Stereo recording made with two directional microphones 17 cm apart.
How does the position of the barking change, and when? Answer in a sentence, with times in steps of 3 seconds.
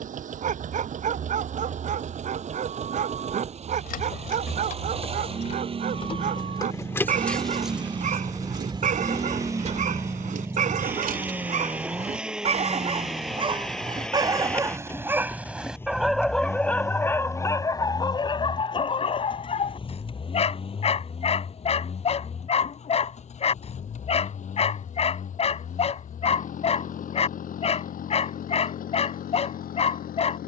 In this clip you hear the barking on the right from 0 s, in the centre from 15 s and on the left from 18 s.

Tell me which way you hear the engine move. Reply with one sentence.
You can hear the engine travel towards the left.